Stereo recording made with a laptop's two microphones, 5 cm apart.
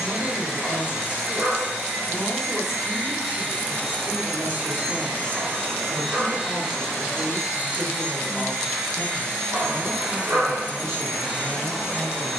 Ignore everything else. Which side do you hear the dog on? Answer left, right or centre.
right.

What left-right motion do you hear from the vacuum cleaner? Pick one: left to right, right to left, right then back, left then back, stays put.
right to left.